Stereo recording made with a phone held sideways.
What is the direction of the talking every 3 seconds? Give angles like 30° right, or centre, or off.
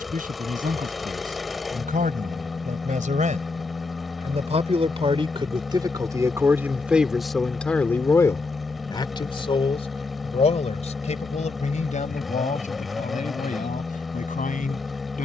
70° right, 50° right, centre, 50° left, 60° left.